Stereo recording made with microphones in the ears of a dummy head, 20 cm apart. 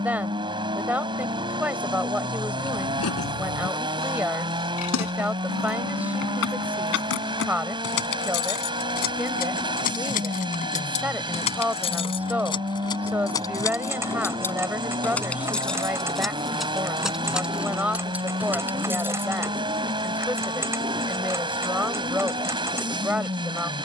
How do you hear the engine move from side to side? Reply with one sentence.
You can hear the engine stay put.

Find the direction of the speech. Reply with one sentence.
In this clip you hear the speech in the centre.